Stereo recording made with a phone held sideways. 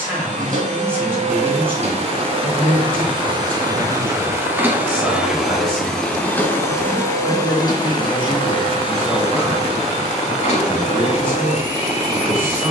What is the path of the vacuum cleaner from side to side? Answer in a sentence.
In this clip you hear the vacuum cleaner move to the left.